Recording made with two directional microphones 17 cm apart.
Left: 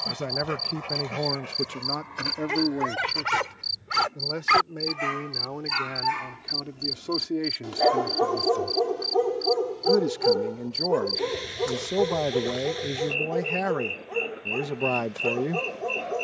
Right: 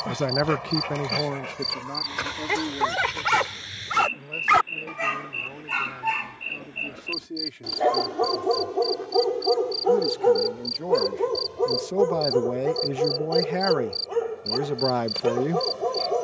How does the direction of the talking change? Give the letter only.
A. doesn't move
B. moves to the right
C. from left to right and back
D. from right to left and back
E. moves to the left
D.